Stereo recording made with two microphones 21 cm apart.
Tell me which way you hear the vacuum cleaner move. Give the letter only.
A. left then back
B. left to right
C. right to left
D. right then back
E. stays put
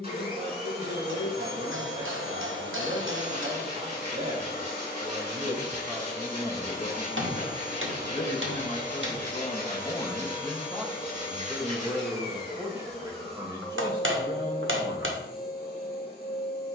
E.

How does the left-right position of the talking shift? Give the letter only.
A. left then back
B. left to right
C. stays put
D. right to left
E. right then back
A.